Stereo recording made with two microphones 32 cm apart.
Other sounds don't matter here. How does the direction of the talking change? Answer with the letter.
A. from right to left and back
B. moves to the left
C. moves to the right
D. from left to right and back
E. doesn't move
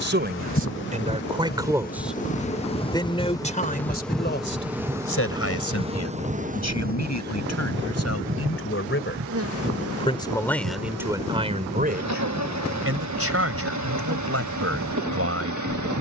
A.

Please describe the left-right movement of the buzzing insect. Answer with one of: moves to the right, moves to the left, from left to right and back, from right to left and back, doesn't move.
moves to the right.